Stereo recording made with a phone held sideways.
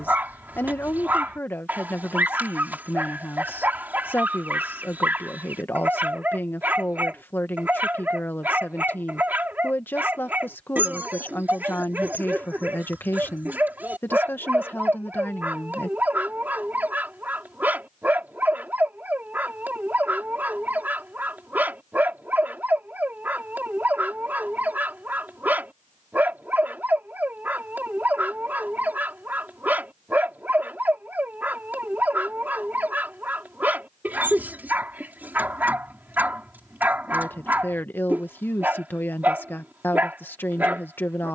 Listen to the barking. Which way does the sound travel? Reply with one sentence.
In this clip you hear the barking stay put.